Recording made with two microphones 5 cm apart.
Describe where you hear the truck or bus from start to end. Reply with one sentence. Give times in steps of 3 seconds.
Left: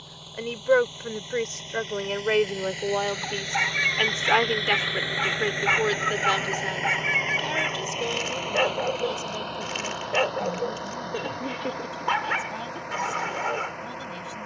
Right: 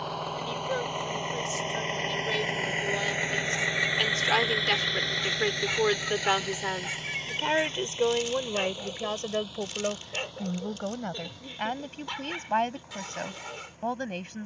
In this clip you hear the truck or bus on the right from 0 s, in the centre from 3 s and on the left from 6 s.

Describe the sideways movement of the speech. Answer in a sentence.
In this clip you hear the speech go from the left side to the right.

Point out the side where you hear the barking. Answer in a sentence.
In this clip you hear the barking on the left.